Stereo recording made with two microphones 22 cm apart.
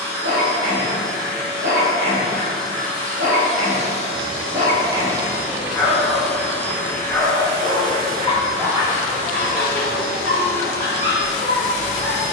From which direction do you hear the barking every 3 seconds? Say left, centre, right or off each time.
right, right, centre, right.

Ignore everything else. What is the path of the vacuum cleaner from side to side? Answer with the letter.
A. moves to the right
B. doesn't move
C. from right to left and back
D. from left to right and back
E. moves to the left
E.